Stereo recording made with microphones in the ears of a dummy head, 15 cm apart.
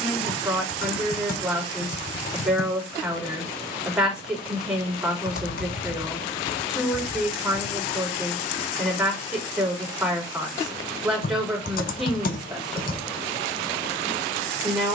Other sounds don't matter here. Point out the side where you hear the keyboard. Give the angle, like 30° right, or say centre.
60° left.